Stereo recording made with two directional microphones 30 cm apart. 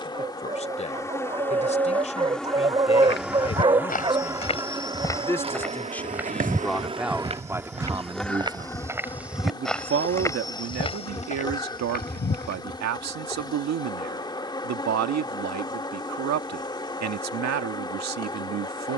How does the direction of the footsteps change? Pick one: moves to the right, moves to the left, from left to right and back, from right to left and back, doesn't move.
from left to right and back.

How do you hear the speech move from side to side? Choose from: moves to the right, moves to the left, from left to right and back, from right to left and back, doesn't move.
moves to the right.